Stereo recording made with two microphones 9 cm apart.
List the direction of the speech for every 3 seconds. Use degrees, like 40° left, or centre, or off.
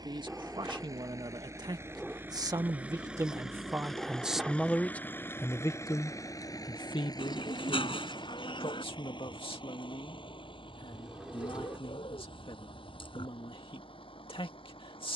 50° right, centre, 60° left, 80° left, 80° left.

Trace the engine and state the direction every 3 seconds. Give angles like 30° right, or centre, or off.
30° right, 10° left, 50° left, 70° left, 70° left.